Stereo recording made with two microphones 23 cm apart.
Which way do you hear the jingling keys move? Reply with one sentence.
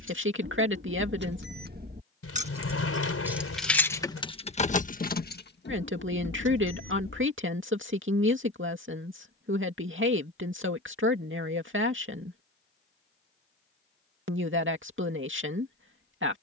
In this clip you hear the jingling keys travel towards the left.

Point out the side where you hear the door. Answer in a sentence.
You can hear the door on the left.